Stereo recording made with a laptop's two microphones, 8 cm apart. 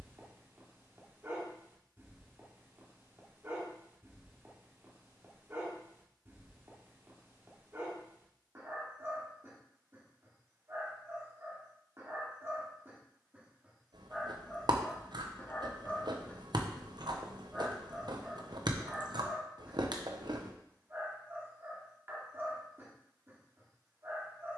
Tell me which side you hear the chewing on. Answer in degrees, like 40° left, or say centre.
70° right.